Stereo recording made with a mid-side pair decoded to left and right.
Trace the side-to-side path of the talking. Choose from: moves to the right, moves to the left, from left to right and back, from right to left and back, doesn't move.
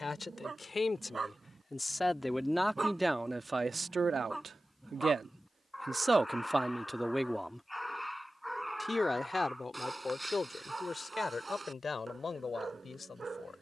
from left to right and back.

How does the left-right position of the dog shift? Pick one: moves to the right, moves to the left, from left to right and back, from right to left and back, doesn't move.
from right to left and back.